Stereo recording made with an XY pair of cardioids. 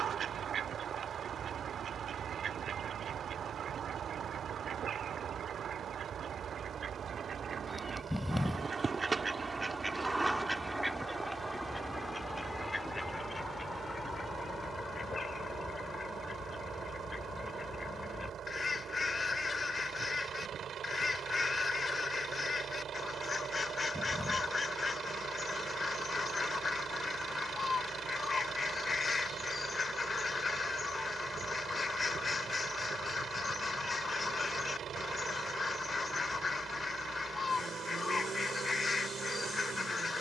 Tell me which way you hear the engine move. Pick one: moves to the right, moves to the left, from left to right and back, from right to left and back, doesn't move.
doesn't move.